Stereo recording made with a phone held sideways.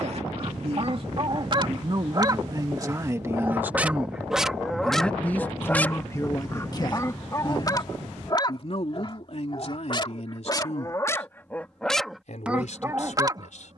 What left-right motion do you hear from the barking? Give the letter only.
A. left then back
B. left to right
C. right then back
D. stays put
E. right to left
A.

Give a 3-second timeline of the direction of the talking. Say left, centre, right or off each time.
right, centre, left, left, left.